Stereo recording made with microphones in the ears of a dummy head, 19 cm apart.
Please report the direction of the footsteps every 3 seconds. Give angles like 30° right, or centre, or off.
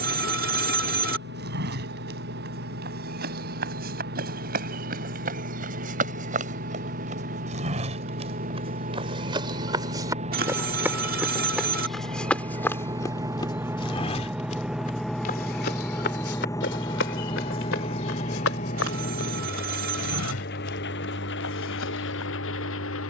50° right, 40° right, 30° right, 10° right, 20° left, 50° left, 70° left, 80° left.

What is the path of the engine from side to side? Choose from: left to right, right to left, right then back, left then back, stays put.
right to left.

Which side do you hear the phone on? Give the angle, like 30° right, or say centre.
40° right.